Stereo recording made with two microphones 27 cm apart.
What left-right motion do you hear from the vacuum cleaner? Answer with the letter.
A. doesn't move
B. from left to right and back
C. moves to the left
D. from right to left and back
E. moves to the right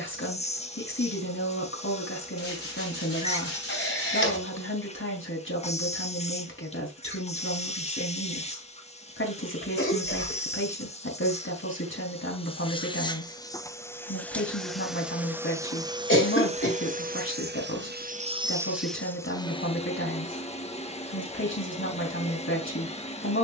B.